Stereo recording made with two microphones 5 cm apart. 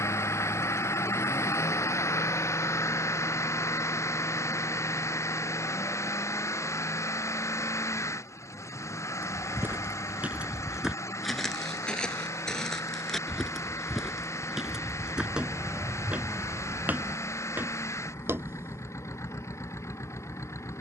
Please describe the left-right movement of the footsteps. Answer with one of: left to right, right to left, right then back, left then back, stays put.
left then back.